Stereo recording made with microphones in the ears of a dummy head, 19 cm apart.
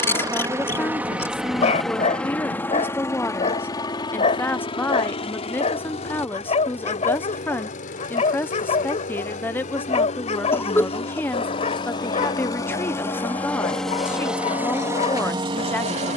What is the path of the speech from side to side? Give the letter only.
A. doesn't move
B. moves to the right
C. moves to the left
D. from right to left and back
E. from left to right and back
A.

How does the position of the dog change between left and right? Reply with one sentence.
In this clip you hear the dog stay in one place.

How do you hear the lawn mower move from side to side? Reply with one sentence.
In this clip you hear the lawn mower move from right to left and back again.